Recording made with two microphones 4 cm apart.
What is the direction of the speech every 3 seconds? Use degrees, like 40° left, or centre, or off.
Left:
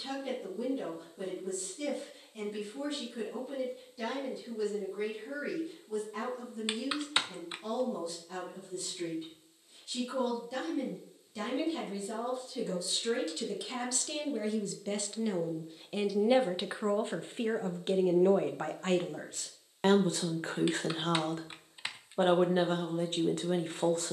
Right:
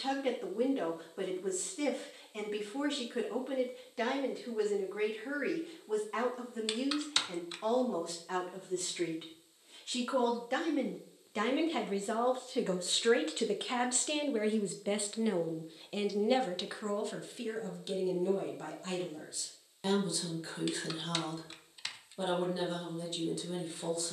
60° right, 60° right, 60° right, 60° right, 40° right, 10° left, 50° left, 50° left.